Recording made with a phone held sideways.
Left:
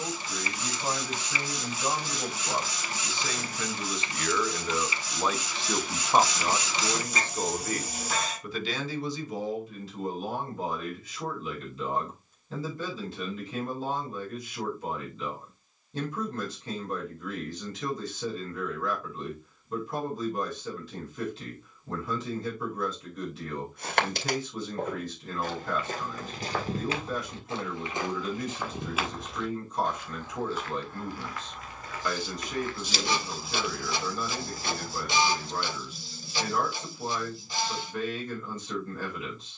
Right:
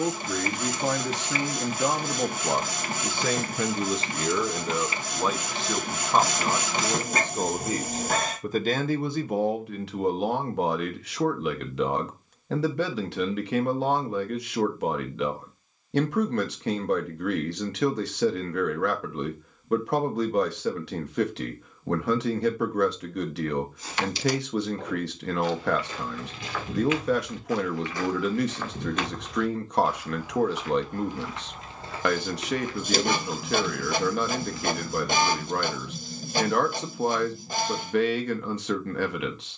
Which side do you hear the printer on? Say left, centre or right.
right.